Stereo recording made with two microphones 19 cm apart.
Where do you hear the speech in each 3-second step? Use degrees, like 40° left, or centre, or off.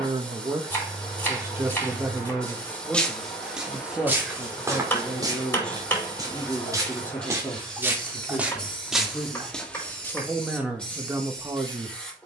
10° right, centre, 10° left, 10° right.